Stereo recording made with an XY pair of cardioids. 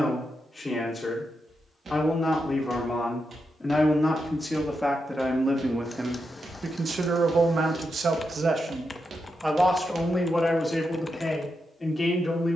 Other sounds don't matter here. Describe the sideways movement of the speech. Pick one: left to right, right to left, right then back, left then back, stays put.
right then back.